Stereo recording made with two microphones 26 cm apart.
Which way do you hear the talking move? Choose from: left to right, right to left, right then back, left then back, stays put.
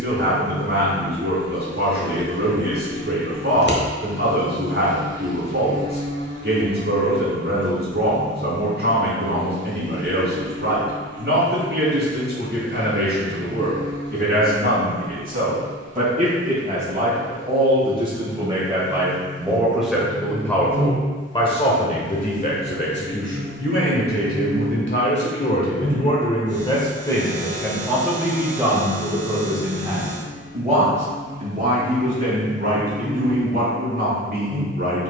left then back.